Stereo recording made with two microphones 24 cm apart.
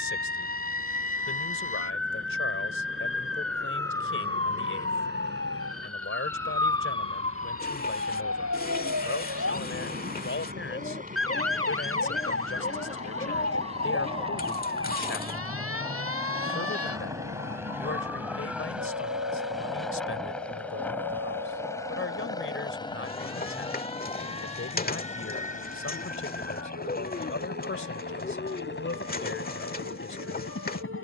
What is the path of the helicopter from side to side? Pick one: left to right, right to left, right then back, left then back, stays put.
right to left.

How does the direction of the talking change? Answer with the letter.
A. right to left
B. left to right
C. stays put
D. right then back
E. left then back
C.